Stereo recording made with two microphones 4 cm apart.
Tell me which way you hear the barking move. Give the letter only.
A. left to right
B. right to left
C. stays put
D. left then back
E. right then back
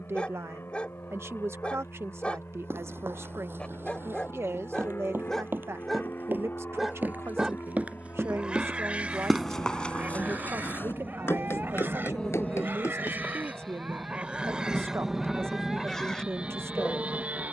E.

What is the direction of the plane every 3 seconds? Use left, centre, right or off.
left, left, left, left, centre, right.